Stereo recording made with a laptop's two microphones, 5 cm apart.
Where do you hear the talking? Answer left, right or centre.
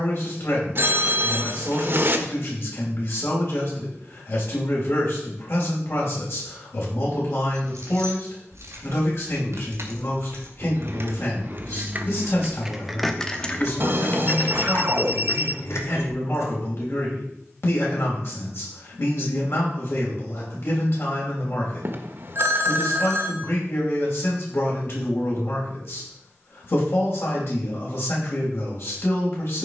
left.